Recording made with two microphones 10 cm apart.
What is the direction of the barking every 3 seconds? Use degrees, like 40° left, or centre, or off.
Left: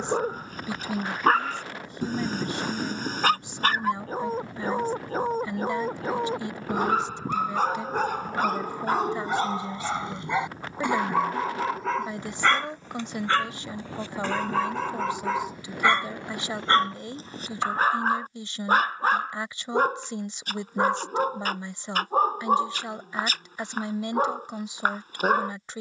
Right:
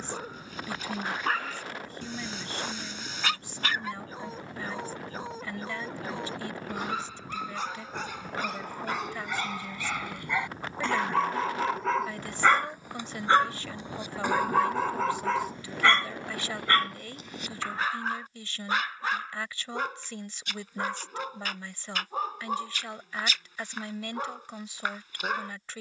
50° left, 50° left, 50° left, 20° left, 10° right, 20° left, 40° left, 40° left, 40° left.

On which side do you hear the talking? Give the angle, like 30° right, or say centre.
20° left.